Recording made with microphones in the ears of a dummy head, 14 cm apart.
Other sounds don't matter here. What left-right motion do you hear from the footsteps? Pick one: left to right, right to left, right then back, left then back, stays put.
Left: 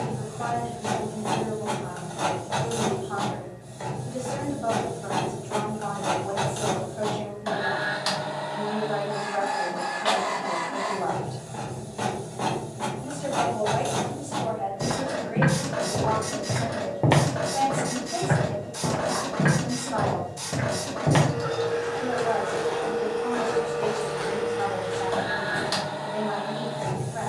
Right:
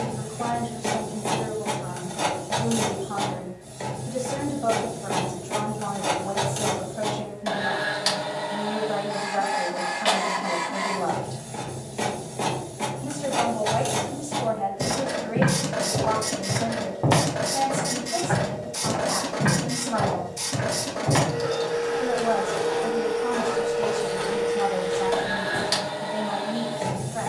left then back.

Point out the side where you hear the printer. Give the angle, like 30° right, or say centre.
20° right.